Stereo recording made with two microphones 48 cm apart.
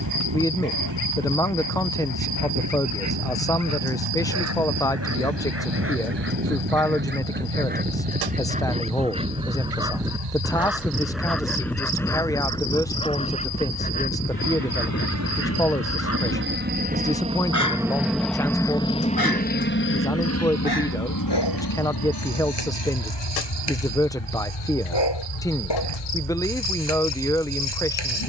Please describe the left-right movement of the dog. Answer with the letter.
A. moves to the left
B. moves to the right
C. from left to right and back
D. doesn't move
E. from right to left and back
A.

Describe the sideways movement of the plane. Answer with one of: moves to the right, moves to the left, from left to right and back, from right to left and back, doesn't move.
moves to the left.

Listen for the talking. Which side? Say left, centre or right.
centre.